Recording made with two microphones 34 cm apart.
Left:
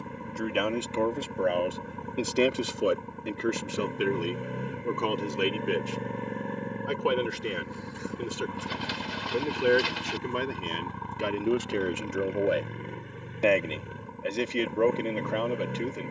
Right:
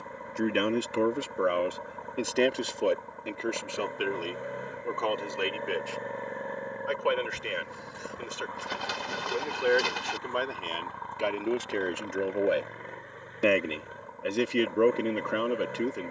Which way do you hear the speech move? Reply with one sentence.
You can hear the speech go left and come back.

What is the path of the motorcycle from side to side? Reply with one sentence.
You can hear the motorcycle stay in one place.